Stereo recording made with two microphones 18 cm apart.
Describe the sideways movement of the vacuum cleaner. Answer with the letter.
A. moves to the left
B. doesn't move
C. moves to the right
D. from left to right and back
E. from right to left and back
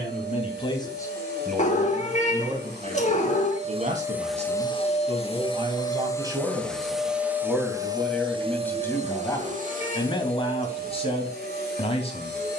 E.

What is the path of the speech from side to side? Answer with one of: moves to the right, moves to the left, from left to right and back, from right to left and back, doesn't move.
from left to right and back.